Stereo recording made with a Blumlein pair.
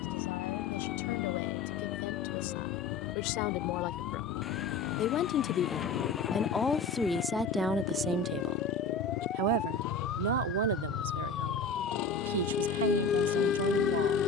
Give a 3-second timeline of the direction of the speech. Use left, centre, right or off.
left, left, centre, right, right.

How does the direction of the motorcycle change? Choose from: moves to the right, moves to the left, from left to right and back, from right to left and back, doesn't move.
doesn't move.